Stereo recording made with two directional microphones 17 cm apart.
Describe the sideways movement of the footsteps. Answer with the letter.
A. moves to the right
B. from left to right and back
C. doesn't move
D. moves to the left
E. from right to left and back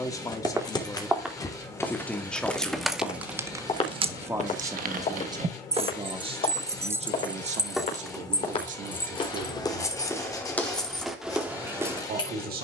E.